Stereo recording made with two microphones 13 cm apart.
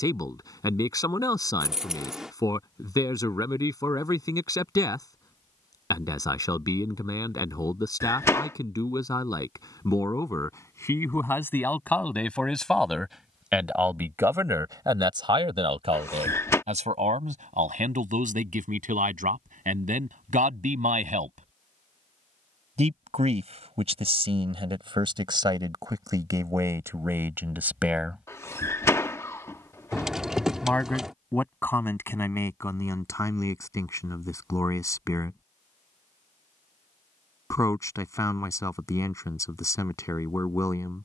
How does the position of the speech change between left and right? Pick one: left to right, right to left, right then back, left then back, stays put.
right then back.